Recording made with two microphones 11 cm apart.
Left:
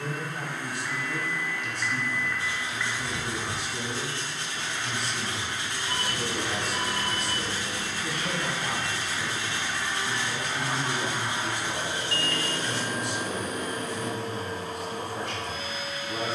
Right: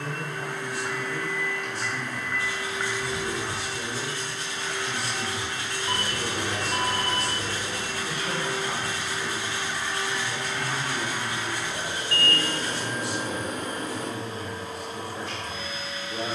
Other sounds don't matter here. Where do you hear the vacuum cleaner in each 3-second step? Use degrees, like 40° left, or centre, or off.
70° right, 70° right, 40° right, 10° left, 50° left, 60° left.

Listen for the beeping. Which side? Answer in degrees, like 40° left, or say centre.
50° right.